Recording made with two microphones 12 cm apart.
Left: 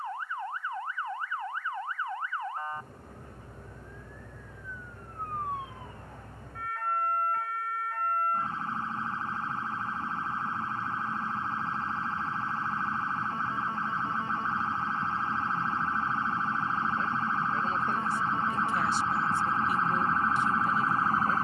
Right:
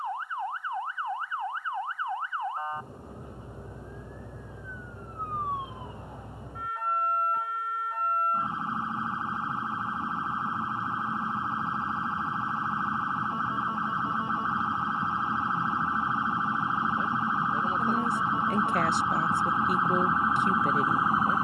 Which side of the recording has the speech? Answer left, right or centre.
right.